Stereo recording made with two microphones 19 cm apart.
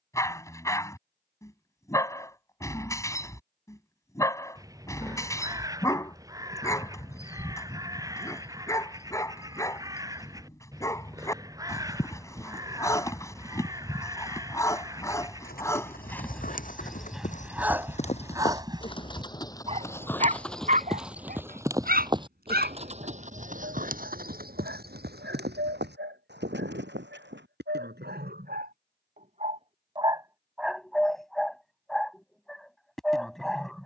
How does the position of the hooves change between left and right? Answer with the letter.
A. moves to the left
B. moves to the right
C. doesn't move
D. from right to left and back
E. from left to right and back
B.